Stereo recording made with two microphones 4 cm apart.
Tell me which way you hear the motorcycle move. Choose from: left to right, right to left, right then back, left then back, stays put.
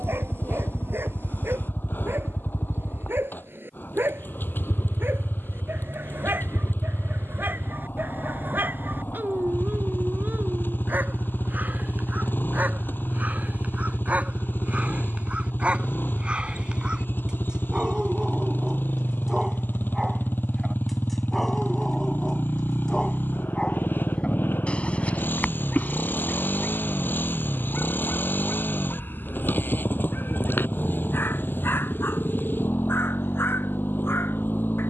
stays put.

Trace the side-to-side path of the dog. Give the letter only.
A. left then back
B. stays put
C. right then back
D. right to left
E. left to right
D.